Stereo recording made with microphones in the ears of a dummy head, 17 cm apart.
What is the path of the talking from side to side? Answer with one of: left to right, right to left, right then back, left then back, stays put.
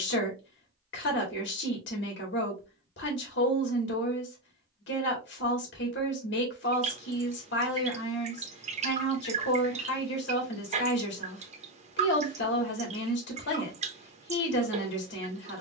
stays put.